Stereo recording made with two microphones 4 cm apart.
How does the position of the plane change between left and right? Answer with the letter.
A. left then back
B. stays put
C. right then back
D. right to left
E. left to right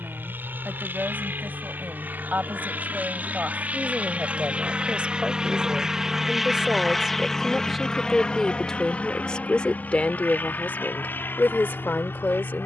D.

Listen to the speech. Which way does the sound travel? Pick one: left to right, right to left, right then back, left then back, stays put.
right to left.